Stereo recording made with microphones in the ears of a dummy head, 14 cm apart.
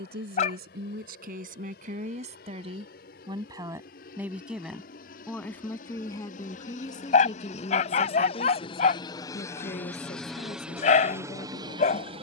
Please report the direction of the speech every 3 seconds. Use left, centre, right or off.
right, centre, left, left.